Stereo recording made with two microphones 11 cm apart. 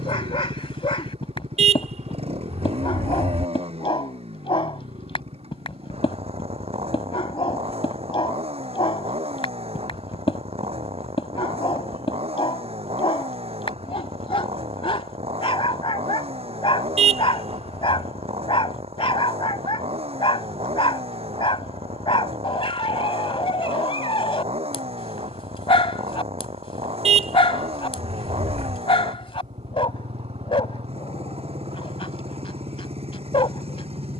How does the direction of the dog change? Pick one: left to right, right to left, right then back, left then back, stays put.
stays put.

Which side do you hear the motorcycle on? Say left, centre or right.
right.